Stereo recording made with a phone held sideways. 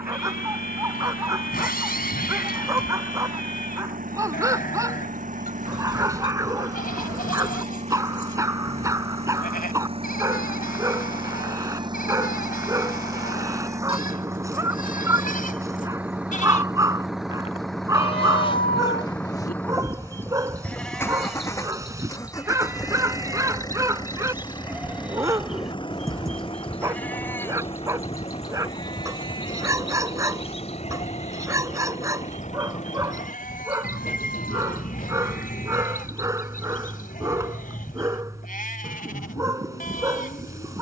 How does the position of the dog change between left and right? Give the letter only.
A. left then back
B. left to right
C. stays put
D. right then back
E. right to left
C.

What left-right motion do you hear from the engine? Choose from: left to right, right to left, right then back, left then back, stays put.
right to left.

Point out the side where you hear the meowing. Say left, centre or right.
left.